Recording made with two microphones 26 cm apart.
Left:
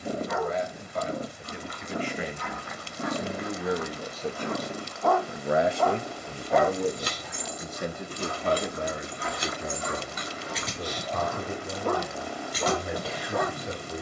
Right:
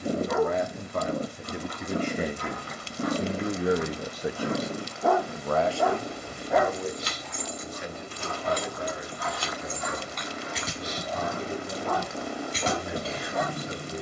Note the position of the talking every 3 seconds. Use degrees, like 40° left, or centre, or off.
50° right, 10° right, 50° left, 60° left, 70° left.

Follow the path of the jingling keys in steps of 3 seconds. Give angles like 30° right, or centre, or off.
off, off, 50° left, centre, 30° right.